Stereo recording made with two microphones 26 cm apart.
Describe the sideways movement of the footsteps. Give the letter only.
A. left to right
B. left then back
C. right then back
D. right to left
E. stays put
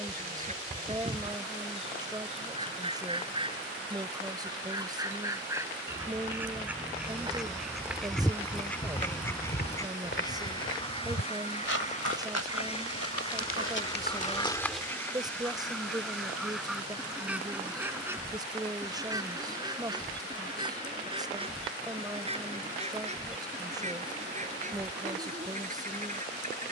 B.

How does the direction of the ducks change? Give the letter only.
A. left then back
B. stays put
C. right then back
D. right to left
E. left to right
A.